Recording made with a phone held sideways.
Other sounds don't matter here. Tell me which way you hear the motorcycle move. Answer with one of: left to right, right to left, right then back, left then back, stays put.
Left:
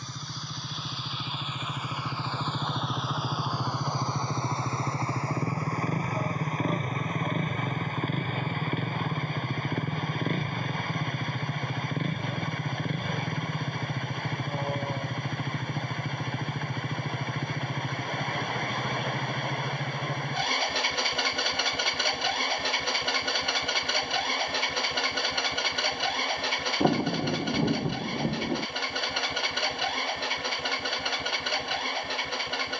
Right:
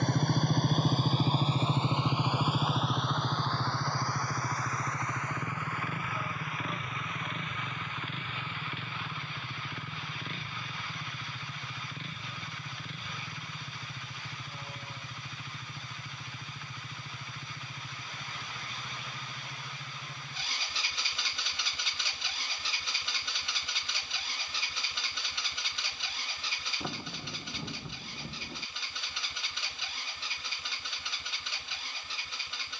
right to left.